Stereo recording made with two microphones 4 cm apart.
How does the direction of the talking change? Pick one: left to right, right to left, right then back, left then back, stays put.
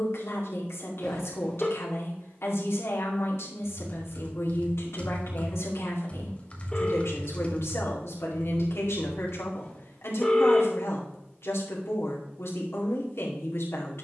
stays put.